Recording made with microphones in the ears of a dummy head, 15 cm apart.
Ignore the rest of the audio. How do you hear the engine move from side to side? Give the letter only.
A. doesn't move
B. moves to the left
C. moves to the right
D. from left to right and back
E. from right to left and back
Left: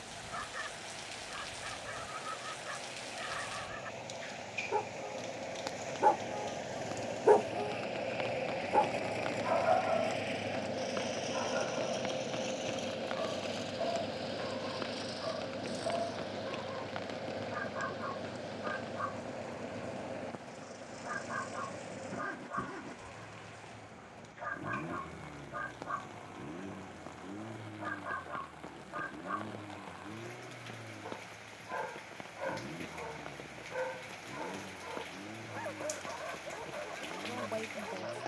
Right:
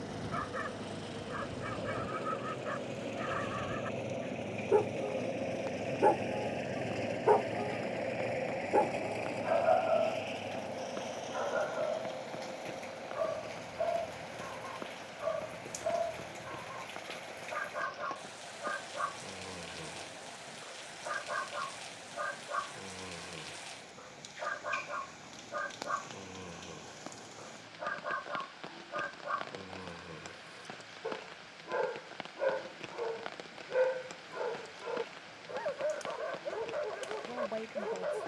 B.